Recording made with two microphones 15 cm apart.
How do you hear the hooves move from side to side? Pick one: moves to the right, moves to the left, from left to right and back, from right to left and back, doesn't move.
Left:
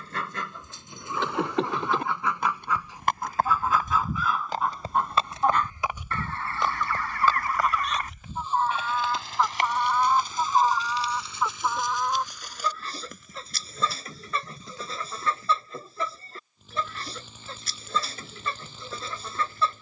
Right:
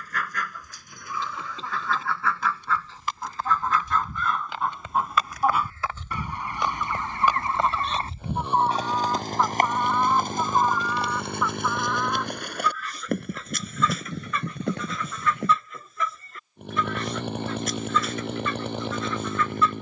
moves to the right.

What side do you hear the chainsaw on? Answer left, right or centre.
right.